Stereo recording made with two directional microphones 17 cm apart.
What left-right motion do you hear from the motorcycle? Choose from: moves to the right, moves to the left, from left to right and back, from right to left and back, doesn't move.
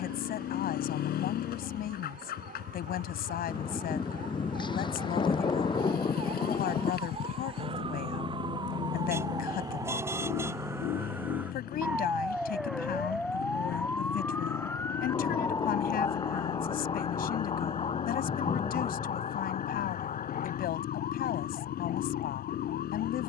doesn't move.